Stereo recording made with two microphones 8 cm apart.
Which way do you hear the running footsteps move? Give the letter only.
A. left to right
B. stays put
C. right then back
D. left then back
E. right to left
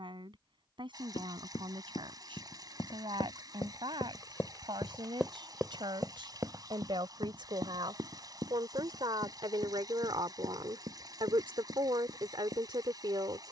A.